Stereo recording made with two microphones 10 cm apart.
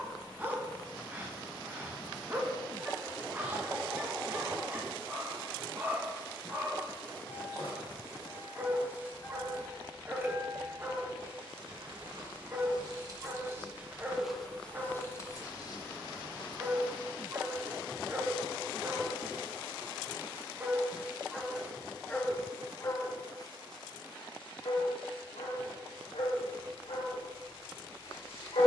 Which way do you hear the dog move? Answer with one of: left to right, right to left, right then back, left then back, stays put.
right to left.